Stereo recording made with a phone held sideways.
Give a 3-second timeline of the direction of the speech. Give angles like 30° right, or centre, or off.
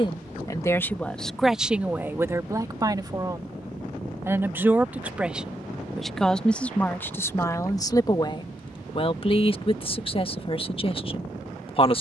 centre, 10° right, 20° left, 40° left.